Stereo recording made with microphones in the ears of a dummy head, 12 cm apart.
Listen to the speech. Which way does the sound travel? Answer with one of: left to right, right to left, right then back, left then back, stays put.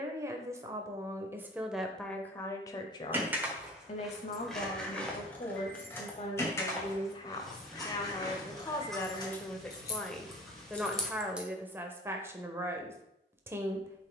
left then back.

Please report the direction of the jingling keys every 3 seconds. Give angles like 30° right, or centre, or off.
off, centre, 30° left, 20° left, off.